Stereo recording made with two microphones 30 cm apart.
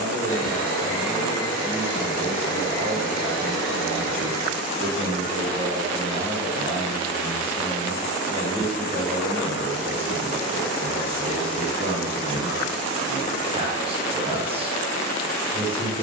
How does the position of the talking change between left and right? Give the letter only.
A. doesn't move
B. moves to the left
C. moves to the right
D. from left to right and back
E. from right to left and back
A.